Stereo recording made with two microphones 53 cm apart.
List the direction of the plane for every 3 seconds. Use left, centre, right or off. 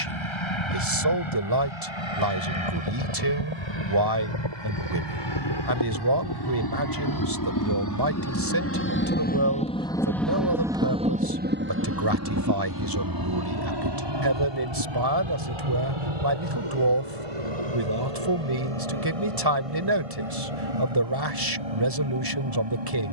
left, left, left, centre, right, right, right, right.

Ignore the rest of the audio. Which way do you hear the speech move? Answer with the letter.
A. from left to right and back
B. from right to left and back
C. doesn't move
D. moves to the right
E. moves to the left
C.